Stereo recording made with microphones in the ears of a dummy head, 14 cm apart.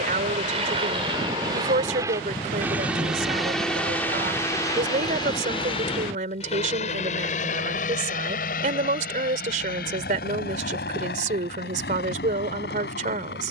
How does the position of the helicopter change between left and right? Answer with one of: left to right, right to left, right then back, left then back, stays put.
right to left.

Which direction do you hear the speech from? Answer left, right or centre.
right.